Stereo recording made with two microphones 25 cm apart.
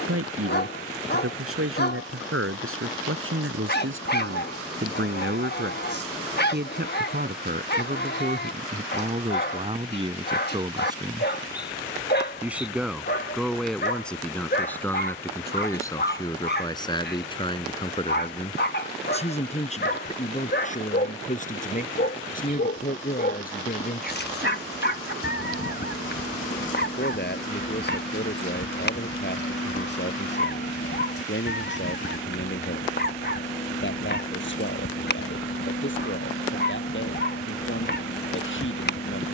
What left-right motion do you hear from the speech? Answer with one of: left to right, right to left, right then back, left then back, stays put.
right to left.